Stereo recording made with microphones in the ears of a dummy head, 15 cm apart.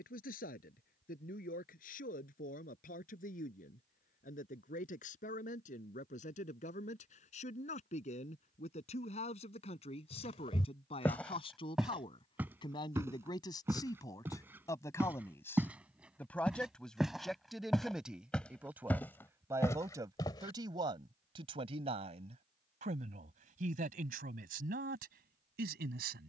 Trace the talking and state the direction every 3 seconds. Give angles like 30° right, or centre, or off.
50° left, 50° left, 40° left, 30° left, 20° left, 10° left, 20° right, 40° right, 60° right.